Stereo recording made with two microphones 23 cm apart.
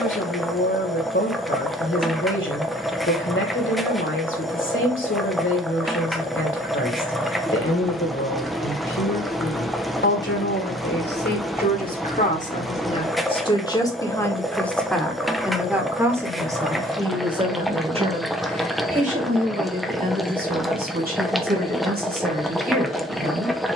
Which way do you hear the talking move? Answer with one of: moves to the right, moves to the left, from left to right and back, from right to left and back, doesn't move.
moves to the right.